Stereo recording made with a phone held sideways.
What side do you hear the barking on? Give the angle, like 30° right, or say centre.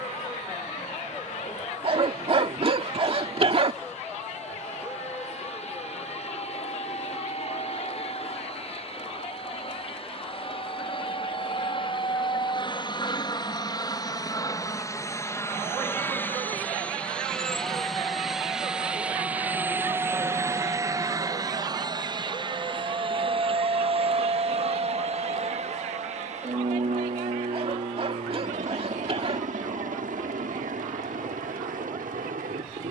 40° right.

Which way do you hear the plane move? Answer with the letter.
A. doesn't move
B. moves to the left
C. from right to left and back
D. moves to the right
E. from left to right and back
D.